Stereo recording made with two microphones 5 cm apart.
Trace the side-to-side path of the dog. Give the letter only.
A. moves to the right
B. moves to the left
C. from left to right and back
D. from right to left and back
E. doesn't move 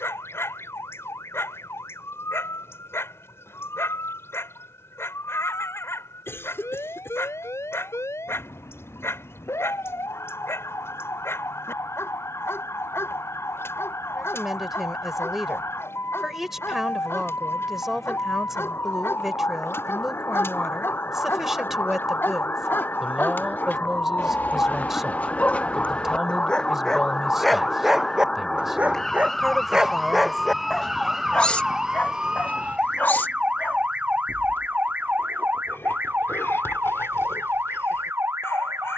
C.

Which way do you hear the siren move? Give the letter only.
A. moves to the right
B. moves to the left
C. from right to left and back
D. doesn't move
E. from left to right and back
A.